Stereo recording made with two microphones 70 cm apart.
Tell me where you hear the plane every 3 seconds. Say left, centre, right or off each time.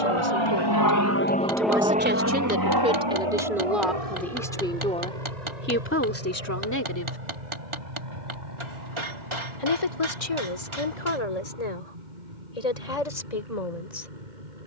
centre, right, right, right, right.